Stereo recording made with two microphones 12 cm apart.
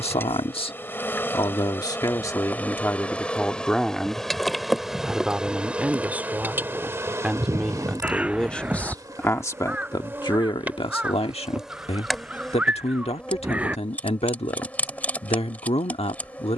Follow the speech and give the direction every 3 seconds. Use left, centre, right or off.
left, centre, centre, left, left, left.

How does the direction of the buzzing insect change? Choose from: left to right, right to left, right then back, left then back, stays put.
right then back.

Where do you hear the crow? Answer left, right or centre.
centre.